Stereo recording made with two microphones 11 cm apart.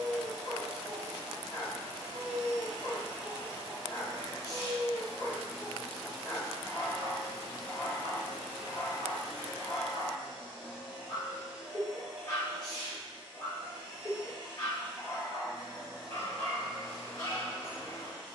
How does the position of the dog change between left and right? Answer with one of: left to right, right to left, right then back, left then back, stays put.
stays put.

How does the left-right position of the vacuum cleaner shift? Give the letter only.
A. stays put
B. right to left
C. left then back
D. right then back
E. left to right
A.